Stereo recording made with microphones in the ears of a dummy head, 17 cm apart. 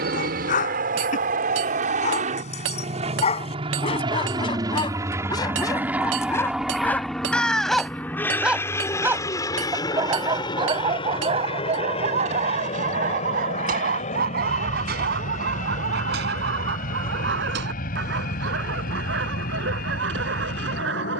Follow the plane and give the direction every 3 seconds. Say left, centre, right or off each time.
right, right, centre, left, left, left, left.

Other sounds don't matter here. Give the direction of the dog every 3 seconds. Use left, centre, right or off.
left, left, centre, right, right, right, right.